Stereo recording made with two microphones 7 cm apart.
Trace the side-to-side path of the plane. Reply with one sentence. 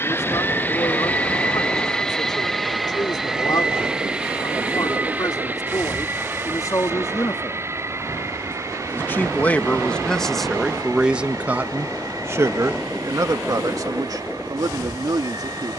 In this clip you hear the plane go from the left side to the right.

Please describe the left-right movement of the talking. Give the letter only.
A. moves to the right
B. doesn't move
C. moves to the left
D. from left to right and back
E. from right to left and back
A.